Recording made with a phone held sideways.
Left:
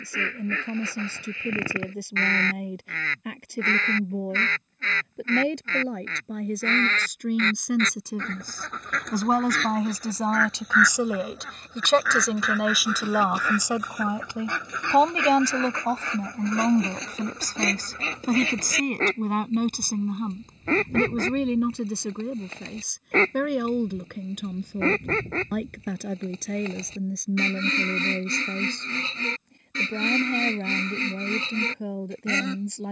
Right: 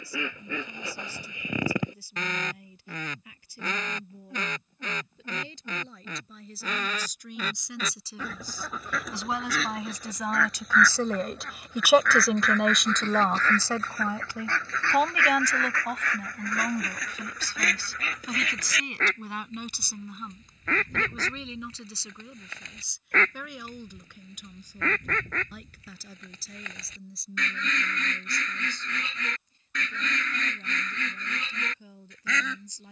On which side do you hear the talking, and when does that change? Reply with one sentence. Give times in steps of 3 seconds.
In this clip you hear the talking on the left from 0 s, in the centre from 12 s and on the left from 15 s.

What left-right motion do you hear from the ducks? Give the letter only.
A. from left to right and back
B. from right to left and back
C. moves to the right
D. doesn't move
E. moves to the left
E.